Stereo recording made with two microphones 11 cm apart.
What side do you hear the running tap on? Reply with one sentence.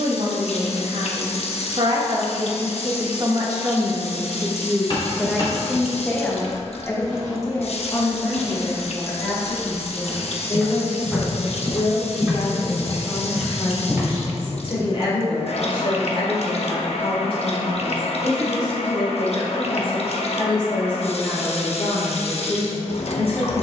In this clip you hear the running tap on the left.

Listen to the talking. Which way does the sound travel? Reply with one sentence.
In this clip you hear the talking go from the right side to the left.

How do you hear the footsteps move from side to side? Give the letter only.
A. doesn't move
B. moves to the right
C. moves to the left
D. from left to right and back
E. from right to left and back
B.